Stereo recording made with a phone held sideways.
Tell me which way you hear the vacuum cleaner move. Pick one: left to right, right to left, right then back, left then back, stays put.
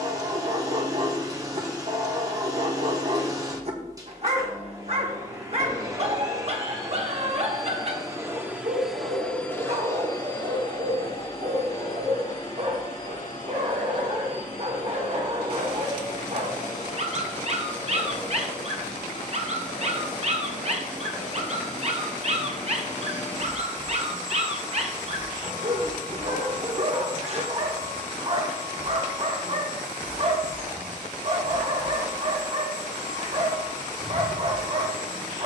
right to left.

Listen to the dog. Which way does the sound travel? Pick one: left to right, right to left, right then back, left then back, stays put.
stays put.